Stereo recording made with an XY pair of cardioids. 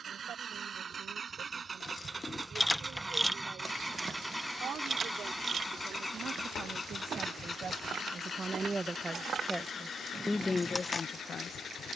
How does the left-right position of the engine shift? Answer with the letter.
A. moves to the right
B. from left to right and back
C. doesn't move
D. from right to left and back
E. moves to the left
E.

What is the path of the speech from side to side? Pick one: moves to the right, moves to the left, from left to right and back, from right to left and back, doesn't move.
moves to the left.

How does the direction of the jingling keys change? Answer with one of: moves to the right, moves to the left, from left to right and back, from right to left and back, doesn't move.
from left to right and back.